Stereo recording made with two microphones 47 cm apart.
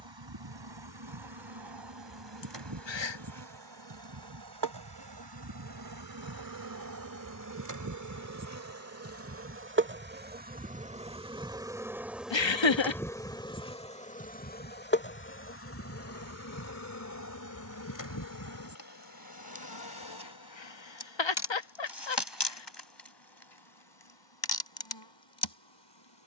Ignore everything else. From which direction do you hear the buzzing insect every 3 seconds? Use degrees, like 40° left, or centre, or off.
60° right, 50° right, 40° right, 20° right, 10° left, 30° left, 50° left, 60° left, 60° left.